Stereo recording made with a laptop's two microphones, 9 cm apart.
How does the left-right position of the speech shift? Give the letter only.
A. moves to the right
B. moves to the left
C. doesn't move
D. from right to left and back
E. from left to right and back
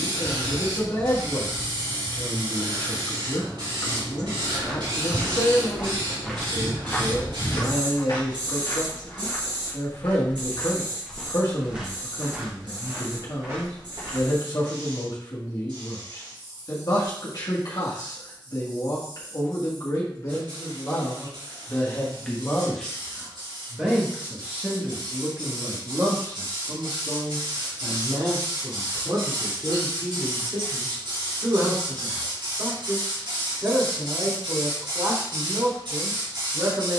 A.